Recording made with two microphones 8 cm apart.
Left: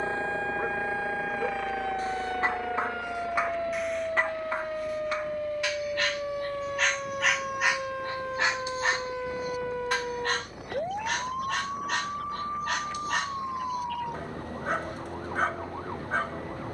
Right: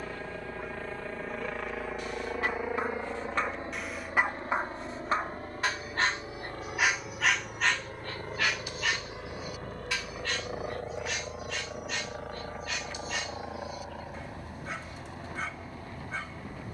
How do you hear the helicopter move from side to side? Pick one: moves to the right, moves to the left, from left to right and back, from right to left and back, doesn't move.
moves to the right.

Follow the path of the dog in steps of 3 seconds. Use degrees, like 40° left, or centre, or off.
30° left, 20° right, 10° left, 50° left, 50° left, 50° left.